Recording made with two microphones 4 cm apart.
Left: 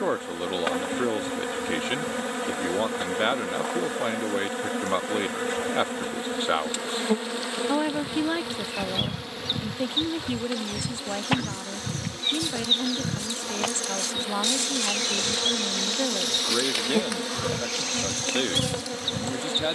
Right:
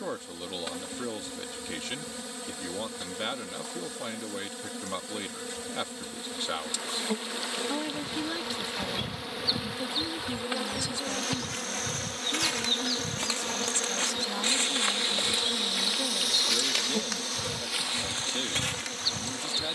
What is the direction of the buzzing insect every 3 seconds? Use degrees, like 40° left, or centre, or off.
50° left, 50° left, 30° left, 10° right, centre, 30° left, 50° left.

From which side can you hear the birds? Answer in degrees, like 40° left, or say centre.
50° left.